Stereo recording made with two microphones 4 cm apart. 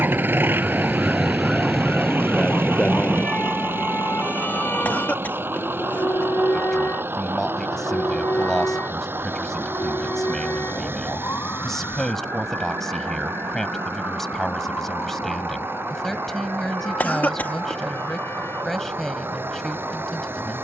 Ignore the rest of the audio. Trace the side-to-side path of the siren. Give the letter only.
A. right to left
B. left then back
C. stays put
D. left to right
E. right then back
A.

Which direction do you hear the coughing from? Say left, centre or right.
left.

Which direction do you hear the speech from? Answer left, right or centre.
centre.